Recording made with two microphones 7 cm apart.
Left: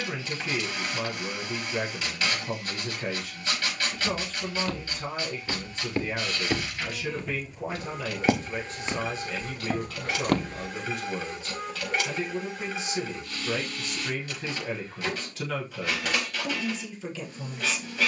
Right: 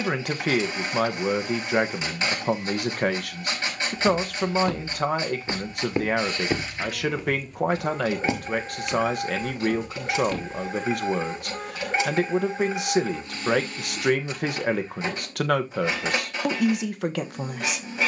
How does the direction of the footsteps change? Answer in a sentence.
In this clip you hear the footsteps move from right to left.